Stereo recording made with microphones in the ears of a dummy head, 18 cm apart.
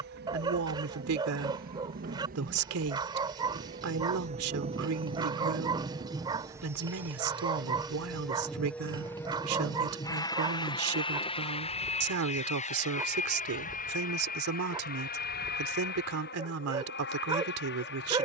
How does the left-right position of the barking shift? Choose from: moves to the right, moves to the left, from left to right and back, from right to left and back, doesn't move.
doesn't move.